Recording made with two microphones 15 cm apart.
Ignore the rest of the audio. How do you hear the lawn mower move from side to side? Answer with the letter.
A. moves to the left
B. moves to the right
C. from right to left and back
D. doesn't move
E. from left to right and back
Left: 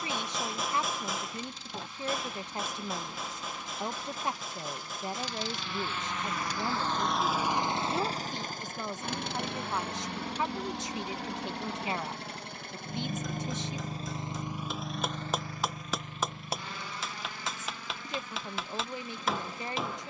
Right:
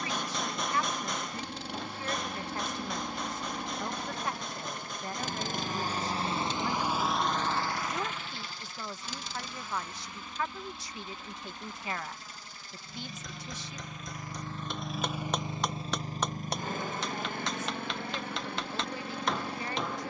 C.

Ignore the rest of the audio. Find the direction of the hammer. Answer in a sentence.
In this clip you hear the hammer in the centre.